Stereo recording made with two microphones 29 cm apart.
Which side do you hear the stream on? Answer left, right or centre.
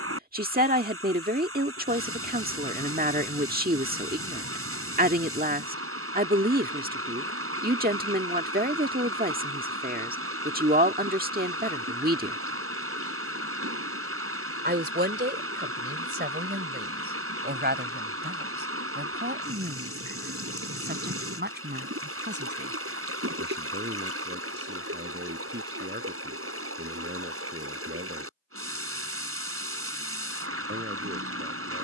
right.